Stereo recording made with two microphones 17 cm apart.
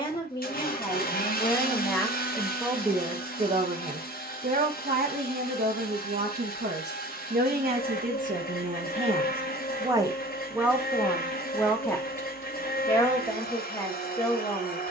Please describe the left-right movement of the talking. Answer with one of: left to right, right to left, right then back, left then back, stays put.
right then back.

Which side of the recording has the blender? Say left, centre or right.
left.